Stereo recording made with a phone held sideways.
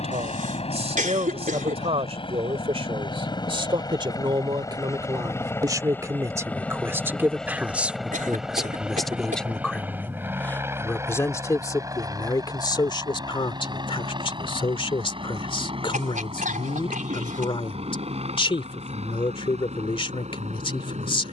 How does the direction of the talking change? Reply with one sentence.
You can hear the talking move to the left.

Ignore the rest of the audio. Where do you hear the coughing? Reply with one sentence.
You can hear the coughing on the right.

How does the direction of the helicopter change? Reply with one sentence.
You can hear the helicopter move from left to right.